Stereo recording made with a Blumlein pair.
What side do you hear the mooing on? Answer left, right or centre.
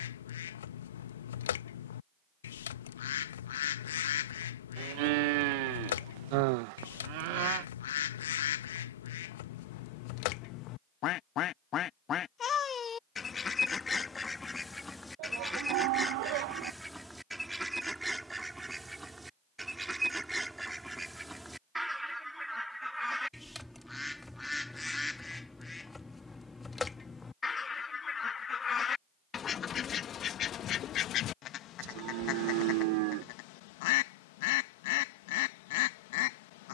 right.